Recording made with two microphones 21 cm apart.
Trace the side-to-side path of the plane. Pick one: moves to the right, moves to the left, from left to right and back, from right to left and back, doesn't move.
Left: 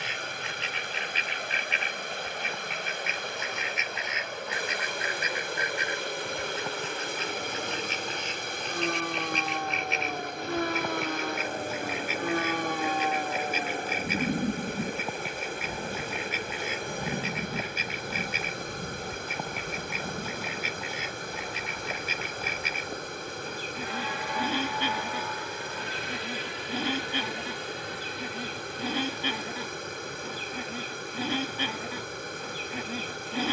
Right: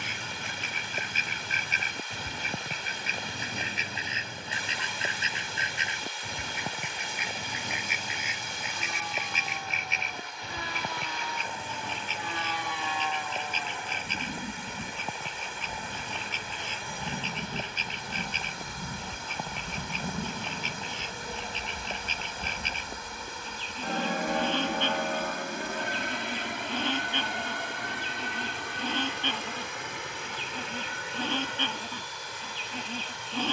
moves to the right.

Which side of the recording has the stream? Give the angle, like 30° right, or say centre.
50° left.